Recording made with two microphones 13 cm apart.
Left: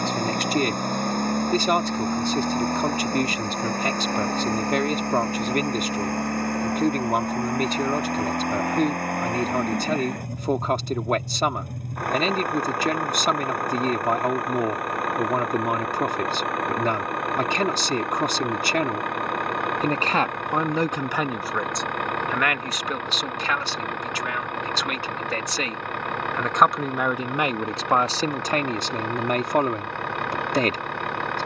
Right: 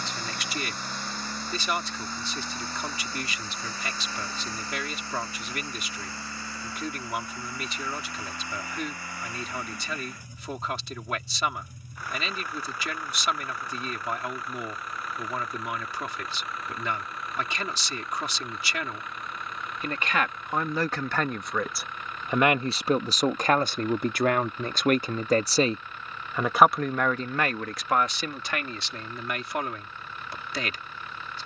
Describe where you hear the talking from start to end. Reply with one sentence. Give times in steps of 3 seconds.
You can hear the talking on the left from 0 s, on the right from 21 s and on the left from 27 s.